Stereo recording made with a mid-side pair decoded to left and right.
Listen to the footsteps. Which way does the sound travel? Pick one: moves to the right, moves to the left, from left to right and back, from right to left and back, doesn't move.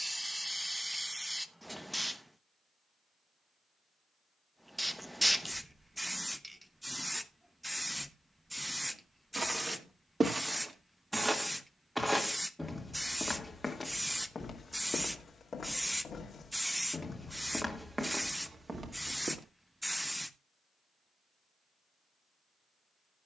from right to left and back.